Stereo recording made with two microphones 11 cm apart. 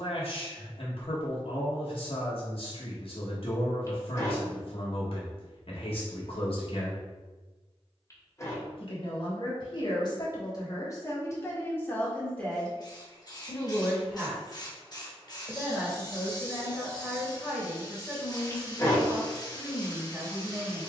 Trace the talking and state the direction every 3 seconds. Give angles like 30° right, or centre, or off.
60° left, 60° left, 60° left, 40° left, centre, 10° right, 10° right.